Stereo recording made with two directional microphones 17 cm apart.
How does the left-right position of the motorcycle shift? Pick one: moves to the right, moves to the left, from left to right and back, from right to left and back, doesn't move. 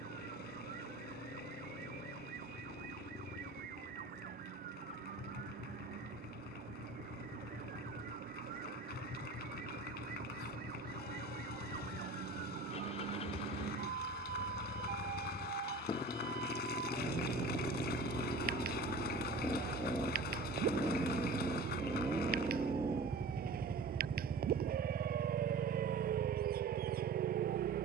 moves to the right.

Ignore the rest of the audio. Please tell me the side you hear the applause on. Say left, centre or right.
left.